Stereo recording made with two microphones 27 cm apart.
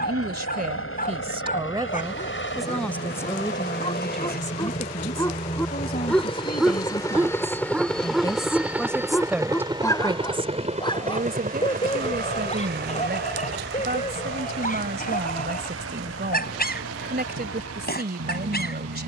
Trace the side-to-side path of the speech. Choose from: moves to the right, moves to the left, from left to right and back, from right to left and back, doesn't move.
from right to left and back.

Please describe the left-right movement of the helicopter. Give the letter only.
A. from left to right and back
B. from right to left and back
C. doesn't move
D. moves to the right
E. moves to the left
D.